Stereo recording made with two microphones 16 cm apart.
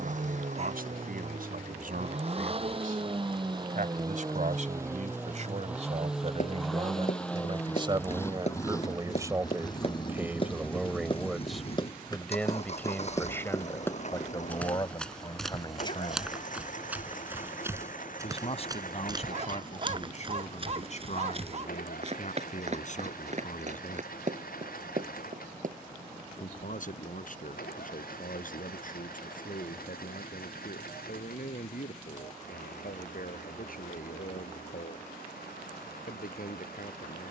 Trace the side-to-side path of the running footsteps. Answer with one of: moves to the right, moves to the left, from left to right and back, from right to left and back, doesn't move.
moves to the right.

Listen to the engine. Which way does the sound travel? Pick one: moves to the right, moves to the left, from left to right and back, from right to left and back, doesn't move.
moves to the left.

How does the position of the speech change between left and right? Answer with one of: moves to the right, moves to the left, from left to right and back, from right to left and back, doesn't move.
moves to the left.